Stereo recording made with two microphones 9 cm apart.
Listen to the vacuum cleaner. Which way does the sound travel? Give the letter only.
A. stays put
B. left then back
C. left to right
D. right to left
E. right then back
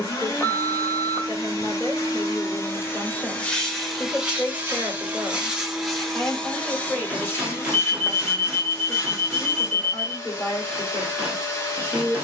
E.